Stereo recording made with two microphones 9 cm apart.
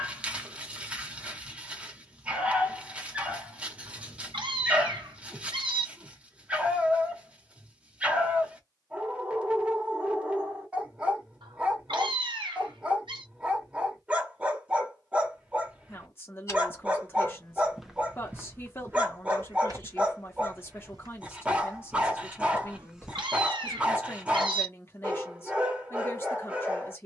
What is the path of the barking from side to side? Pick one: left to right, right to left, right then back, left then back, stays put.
stays put.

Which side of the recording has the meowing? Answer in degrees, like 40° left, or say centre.
80° right.